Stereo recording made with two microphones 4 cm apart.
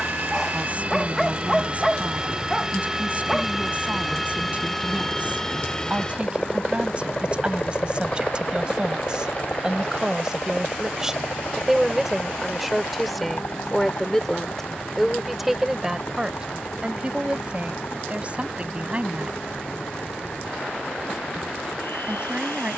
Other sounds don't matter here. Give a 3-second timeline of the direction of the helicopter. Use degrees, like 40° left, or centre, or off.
30° right, centre, 30° left, 40° left, 50° left, 60° left, 60° left, 70° left.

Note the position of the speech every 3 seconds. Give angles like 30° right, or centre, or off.
30° right, 30° right, 30° right, 20° right, centre, 20° right, 30° right, 30° right.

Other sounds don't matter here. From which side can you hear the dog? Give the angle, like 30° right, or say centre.
centre.